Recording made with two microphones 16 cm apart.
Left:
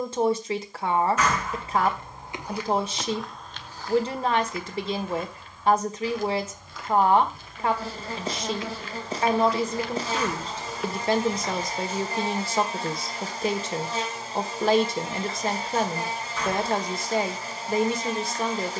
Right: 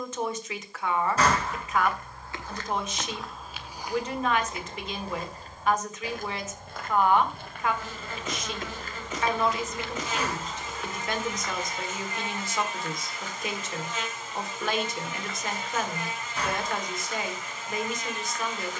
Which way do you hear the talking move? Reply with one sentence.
In this clip you hear the talking stay put.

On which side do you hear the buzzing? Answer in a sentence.
In this clip you hear the buzzing on the left.